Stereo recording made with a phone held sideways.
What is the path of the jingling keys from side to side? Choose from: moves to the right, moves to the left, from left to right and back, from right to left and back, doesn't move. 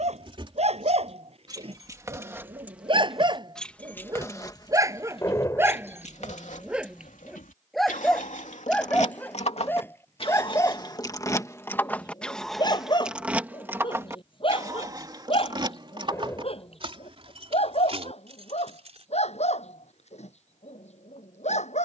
from right to left and back.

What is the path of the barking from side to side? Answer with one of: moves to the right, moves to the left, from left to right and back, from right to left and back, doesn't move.
moves to the left.